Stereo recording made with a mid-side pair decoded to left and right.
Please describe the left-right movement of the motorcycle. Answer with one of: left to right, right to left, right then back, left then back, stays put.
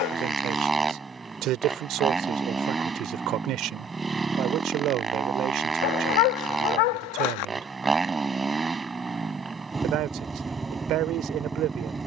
stays put.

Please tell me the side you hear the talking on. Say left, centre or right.
right.